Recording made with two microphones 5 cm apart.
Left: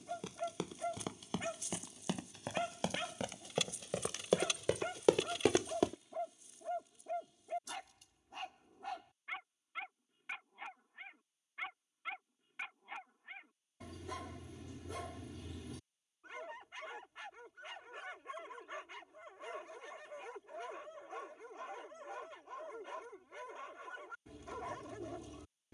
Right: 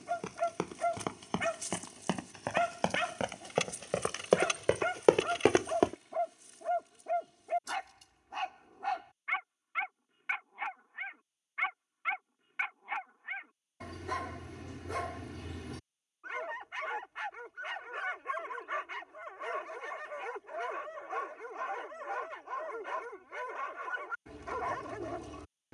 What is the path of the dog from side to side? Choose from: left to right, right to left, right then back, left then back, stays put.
stays put.